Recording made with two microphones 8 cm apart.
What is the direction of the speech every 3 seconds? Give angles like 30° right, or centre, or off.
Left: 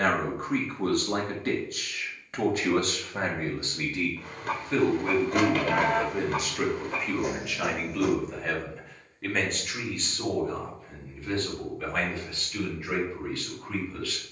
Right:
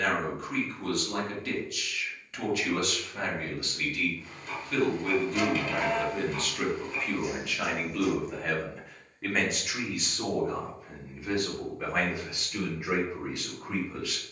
40° left, 30° left, centre, 10° right, 20° right.